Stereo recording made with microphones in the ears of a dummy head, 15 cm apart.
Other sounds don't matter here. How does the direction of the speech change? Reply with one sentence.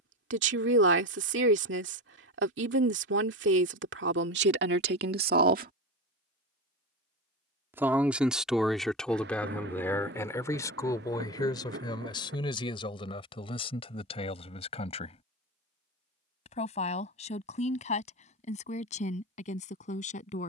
In this clip you hear the speech move to the left.